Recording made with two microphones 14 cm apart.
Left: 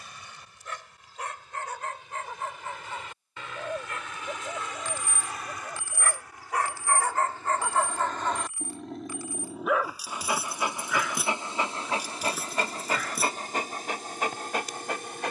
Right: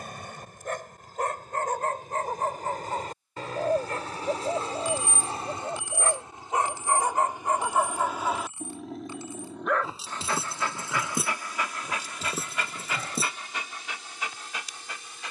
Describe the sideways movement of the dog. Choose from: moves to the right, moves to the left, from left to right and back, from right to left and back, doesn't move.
moves to the left.